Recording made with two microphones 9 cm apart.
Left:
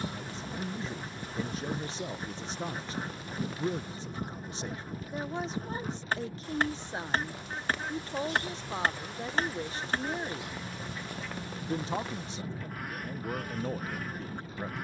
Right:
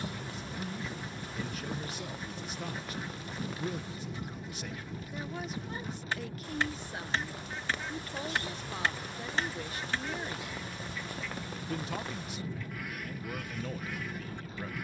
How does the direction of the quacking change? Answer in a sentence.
In this clip you hear the quacking stay in one place.